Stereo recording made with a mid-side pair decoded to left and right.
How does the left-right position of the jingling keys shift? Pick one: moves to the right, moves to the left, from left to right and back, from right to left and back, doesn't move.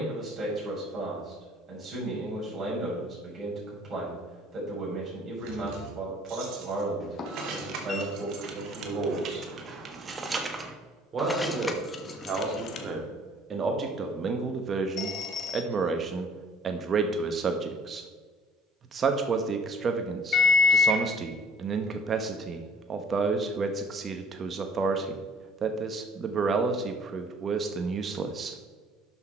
moves to the left.